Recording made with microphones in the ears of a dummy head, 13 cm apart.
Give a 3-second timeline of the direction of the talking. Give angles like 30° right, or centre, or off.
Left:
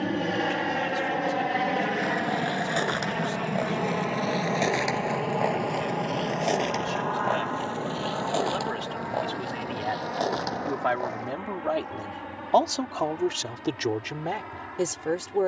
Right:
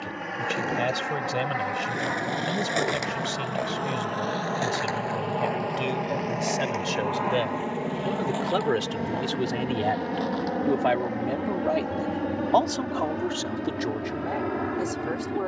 80° right, 80° right, 70° right, 30° right, 20° left.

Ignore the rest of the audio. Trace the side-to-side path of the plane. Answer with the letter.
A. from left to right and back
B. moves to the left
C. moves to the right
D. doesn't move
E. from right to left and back
C.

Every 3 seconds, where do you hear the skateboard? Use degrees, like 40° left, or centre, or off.
30° right, 10° left, 40° left, 50° left, off.